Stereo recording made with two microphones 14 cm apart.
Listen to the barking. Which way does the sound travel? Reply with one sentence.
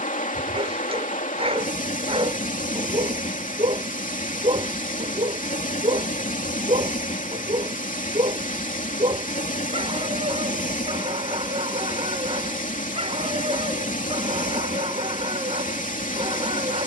In this clip you hear the barking stay put.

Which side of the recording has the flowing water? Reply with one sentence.
In this clip you hear the flowing water on the left.